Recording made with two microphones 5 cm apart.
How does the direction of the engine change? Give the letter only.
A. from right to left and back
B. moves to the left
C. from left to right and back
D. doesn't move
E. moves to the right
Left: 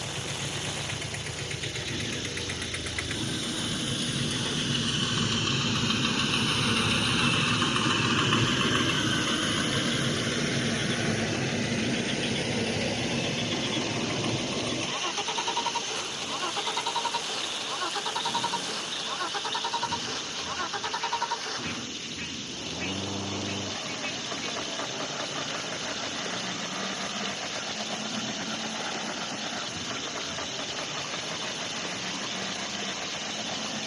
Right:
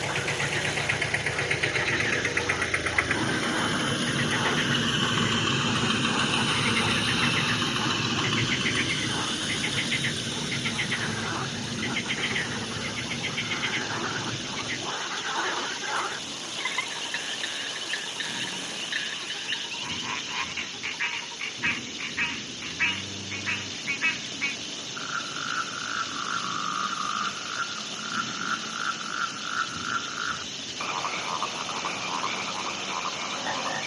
B.